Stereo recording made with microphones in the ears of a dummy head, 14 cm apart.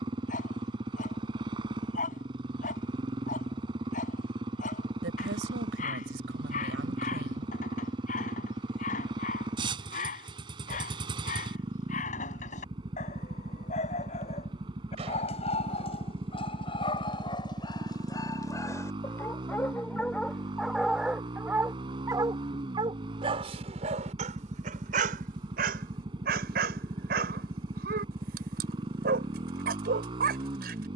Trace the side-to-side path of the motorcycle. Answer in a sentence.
In this clip you hear the motorcycle stay in one place.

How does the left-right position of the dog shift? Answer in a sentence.
In this clip you hear the dog move to the right.